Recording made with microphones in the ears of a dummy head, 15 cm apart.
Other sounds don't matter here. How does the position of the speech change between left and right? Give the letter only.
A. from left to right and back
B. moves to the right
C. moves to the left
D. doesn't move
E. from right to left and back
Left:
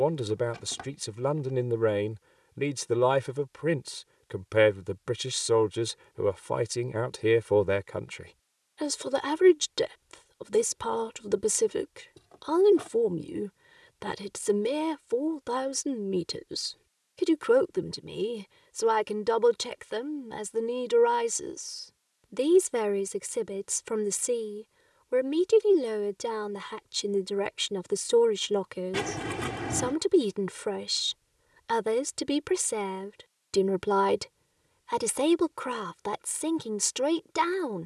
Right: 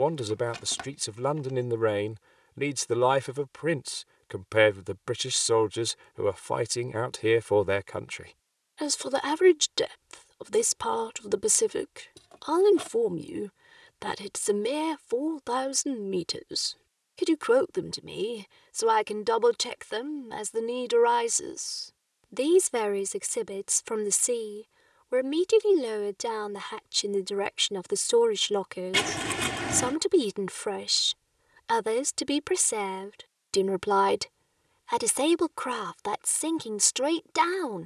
D.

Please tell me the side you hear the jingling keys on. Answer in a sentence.
You can hear the jingling keys on the right.